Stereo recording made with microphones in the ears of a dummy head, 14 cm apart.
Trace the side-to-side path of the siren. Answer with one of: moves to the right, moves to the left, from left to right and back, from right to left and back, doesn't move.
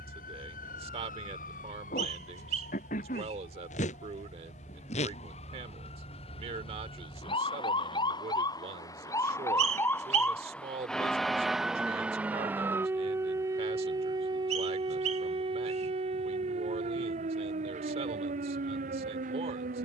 moves to the right.